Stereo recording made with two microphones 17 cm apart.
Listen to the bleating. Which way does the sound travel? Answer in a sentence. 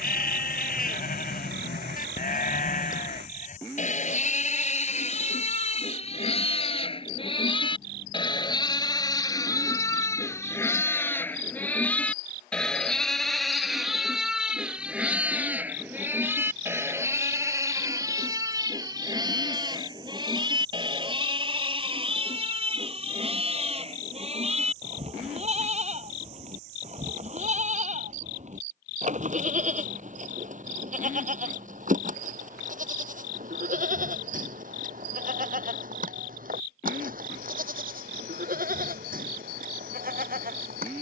In this clip you hear the bleating travel towards the right.